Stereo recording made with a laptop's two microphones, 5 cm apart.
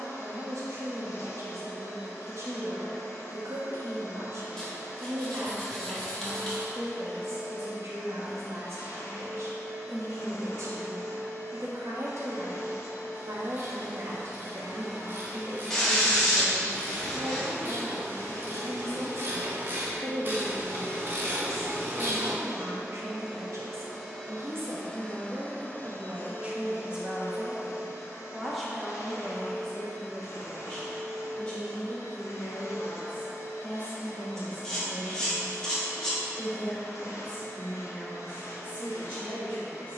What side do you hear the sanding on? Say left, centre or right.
centre.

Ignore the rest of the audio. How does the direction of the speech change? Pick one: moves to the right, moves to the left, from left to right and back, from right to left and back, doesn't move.
moves to the left.